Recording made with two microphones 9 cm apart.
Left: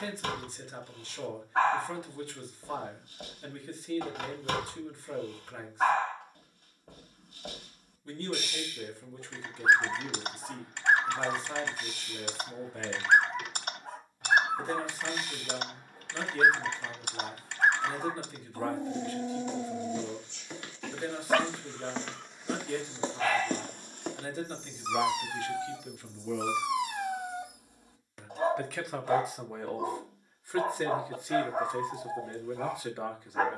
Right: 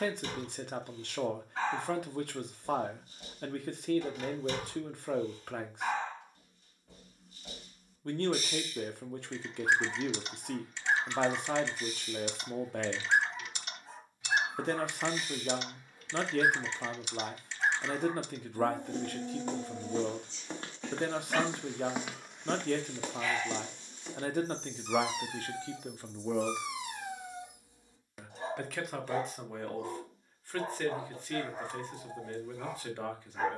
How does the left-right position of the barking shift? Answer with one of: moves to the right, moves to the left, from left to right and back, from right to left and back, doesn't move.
doesn't move.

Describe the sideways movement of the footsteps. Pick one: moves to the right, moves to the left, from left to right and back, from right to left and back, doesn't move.
moves to the left.